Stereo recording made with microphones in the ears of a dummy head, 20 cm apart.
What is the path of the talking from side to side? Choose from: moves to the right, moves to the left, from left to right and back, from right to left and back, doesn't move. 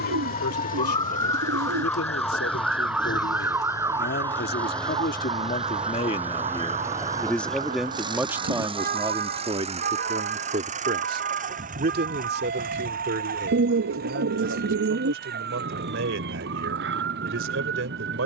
moves to the right.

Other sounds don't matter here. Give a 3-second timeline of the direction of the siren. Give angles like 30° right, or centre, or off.
10° left, 20° right, 30° right, 40° right, 50° right, 50° right.